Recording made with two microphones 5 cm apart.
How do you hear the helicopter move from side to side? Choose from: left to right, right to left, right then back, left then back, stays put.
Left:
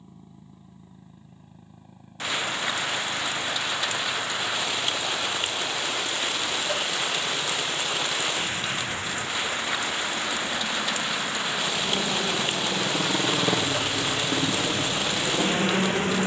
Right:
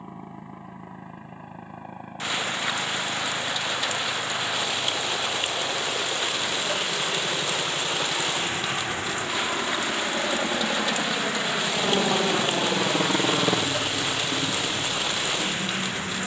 right to left.